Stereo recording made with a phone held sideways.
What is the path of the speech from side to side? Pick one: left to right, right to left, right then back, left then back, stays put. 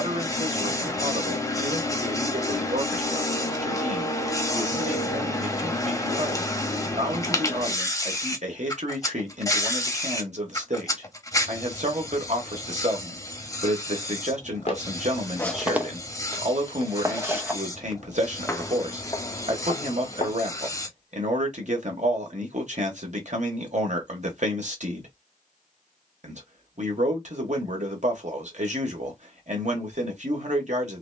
stays put.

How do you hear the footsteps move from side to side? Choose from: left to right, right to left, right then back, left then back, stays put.
right then back.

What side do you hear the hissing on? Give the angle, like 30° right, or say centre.
20° left.